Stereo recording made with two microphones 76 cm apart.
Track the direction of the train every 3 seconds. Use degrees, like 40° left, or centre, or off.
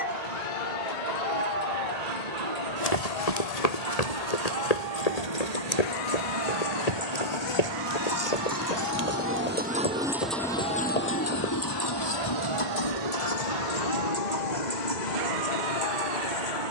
60° right, 50° right, 40° right, centre, 50° left, 70° left.